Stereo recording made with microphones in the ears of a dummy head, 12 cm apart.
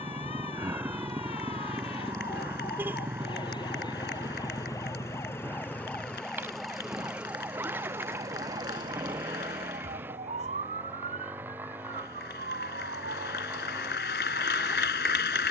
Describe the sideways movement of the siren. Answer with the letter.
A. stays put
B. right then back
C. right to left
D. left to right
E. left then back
D.